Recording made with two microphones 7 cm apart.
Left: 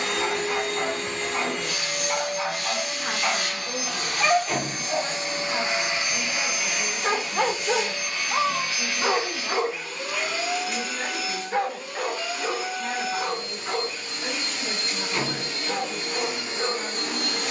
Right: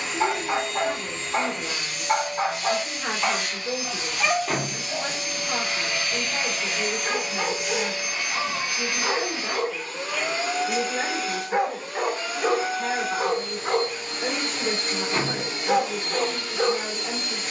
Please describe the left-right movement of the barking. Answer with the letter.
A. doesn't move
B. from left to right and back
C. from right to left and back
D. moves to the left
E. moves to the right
C.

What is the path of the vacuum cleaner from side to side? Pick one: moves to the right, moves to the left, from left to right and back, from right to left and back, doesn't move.
from left to right and back.